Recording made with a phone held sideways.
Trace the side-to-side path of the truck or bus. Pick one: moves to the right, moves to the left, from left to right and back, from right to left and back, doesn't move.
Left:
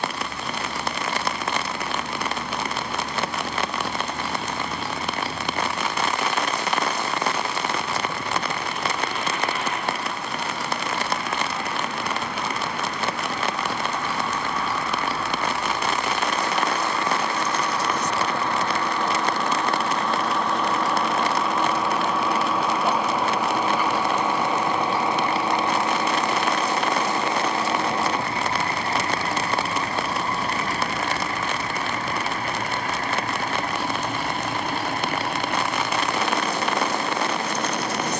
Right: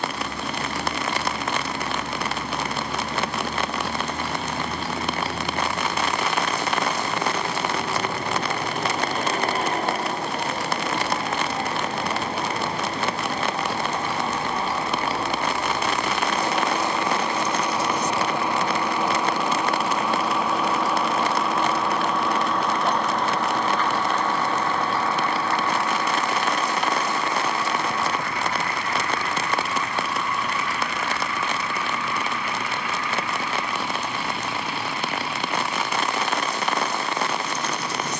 moves to the left.